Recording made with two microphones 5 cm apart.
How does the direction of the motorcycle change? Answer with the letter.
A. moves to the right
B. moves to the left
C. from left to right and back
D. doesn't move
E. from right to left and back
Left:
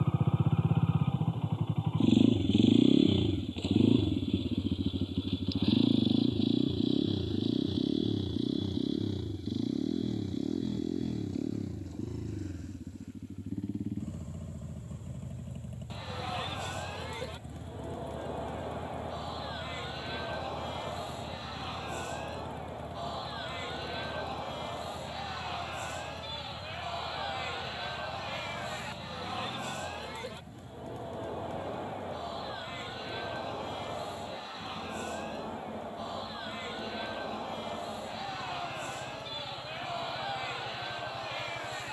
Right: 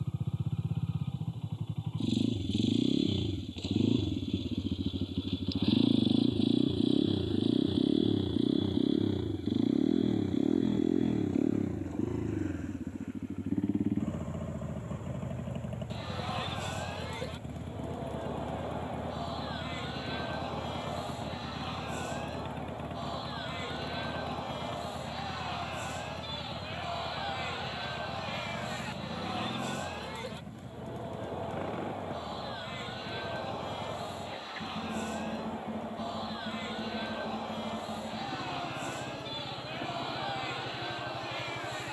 A.